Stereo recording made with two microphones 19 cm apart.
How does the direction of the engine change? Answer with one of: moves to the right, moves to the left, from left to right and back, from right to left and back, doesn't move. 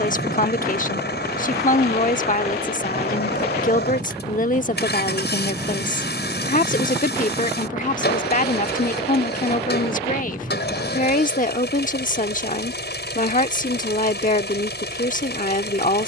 doesn't move.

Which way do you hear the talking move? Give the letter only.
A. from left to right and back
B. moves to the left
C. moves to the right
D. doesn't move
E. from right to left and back
D.